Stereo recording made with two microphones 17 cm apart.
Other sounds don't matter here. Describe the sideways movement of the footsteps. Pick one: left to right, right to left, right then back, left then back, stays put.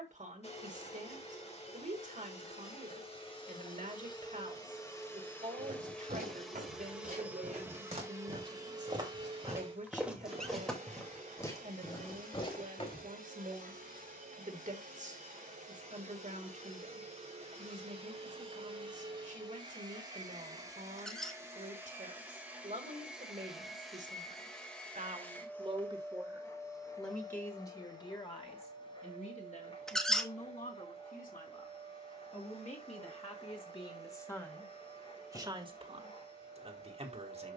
right to left.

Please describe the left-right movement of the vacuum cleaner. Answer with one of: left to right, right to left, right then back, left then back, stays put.
right then back.